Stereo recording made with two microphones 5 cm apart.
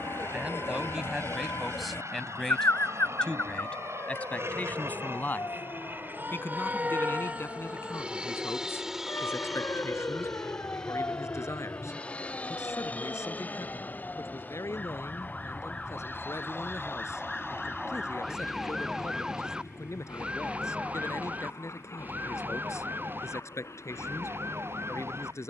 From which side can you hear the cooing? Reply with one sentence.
You can hear the cooing on the left.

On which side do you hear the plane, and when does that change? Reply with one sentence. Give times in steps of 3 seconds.
In this clip you hear the plane on the right from 0 s, in the centre from 9 s and on the left from 12 s.